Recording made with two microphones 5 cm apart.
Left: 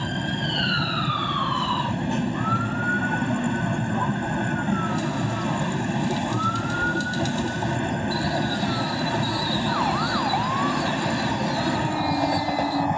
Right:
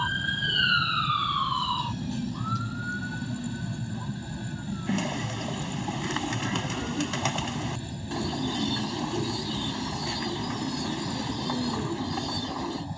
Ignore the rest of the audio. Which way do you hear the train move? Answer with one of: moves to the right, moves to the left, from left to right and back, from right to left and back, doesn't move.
doesn't move.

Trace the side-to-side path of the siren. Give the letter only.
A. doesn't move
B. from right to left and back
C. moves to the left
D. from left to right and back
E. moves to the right
C.